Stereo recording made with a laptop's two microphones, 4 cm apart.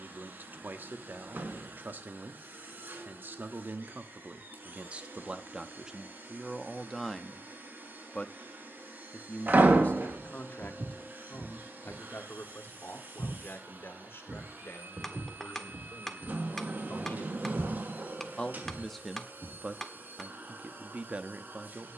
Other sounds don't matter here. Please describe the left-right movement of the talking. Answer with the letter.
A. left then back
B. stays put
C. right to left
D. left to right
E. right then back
A.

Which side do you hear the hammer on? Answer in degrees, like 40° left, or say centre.
10° left.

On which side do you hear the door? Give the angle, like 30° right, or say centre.
50° right.